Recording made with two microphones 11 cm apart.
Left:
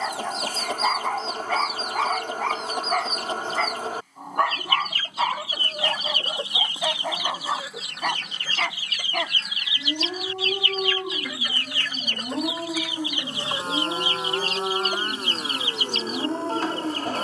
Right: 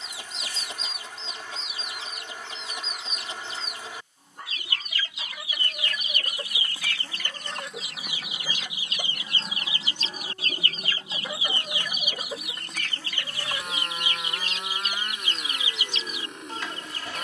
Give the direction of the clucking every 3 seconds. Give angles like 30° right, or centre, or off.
50° left, 40° left, centre, 30° right, 20° left, 50° left.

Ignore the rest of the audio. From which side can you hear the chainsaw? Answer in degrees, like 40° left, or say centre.
30° left.